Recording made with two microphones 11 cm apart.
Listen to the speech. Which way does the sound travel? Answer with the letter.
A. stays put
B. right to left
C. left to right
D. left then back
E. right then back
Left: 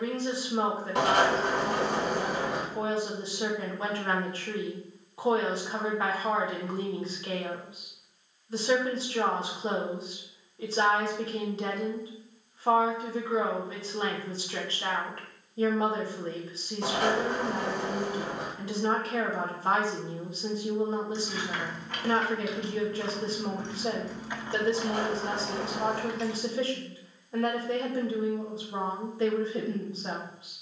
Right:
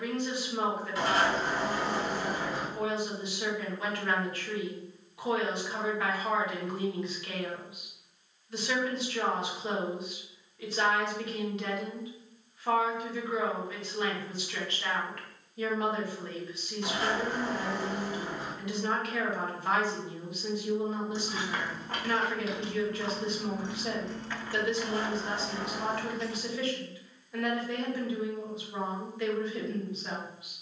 A.